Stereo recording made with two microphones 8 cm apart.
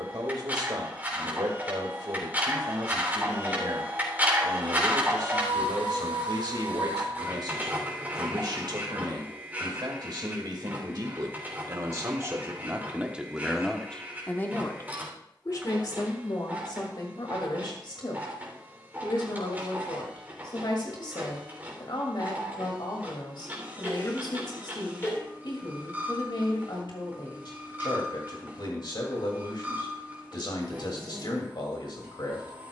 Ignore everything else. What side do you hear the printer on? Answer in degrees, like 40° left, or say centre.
20° right.